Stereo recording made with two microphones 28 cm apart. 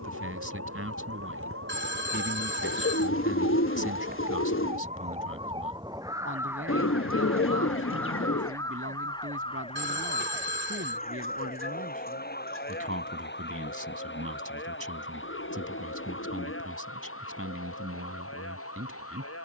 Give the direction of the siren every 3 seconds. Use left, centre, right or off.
right, right, centre, left, left, left, left.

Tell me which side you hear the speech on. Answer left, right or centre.
right.